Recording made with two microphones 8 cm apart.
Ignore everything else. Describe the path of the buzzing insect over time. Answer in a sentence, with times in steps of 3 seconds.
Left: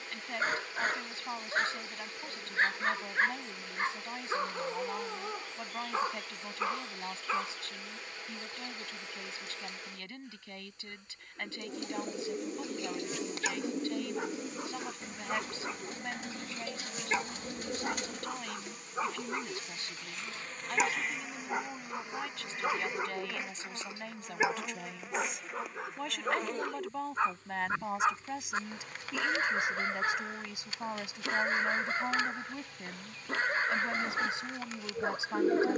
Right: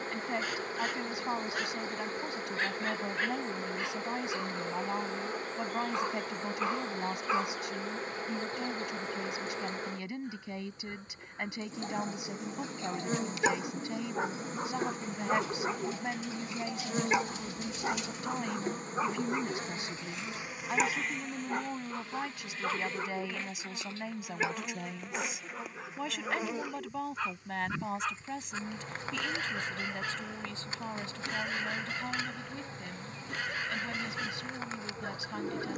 You can hear the buzzing insect on the right from 0 s, in the centre from 21 s and on the right from 27 s.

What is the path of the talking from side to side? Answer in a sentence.
In this clip you hear the talking travel towards the left.